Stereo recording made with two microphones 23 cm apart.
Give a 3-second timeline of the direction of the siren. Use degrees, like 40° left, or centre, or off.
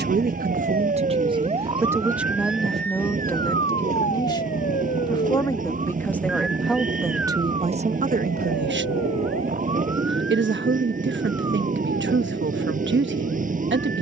30° right, 40° left, 60° left, 70° left, 70° left.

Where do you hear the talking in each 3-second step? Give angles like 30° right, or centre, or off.
20° right, 10° left, 20° right, 50° right, 50° right.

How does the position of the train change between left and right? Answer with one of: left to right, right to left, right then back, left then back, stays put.
stays put.